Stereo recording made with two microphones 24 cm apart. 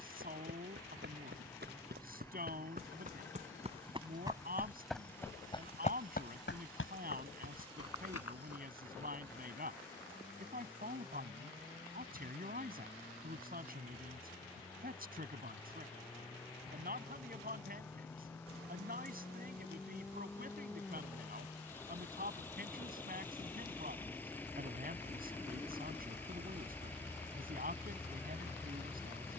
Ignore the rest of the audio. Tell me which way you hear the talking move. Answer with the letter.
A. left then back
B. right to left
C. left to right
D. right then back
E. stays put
E.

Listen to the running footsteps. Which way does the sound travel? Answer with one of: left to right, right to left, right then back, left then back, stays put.
right to left.